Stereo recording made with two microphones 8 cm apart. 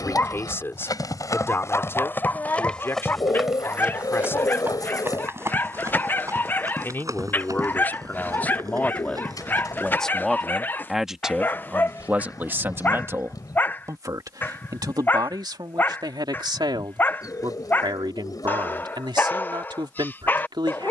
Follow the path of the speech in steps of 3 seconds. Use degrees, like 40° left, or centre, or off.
30° left, 30° left, 20° left, centre, 40° right, 70° right, 80° right.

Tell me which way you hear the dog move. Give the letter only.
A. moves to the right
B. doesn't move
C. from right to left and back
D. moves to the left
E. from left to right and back
B.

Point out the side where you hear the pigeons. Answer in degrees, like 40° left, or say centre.
50° left.